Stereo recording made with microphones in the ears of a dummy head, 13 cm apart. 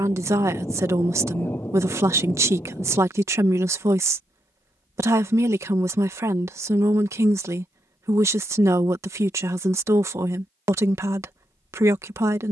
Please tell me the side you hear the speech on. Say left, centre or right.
right.